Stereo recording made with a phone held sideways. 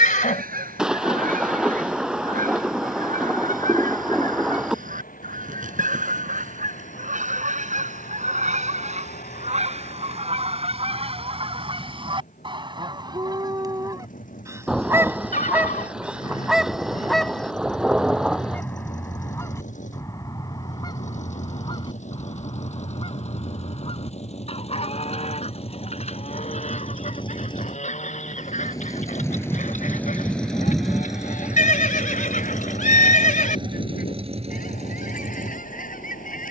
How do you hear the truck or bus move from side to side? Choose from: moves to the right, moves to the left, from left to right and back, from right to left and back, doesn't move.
moves to the right.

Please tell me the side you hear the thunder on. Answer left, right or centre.
centre.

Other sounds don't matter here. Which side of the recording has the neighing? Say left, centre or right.
left.